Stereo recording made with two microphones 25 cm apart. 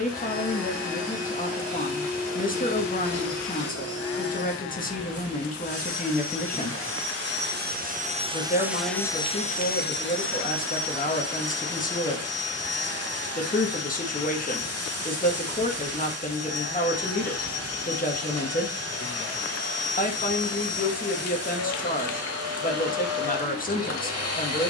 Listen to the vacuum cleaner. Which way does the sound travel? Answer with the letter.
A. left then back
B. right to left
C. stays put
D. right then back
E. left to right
B.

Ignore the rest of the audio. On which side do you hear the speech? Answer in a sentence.
In this clip you hear the speech on the left.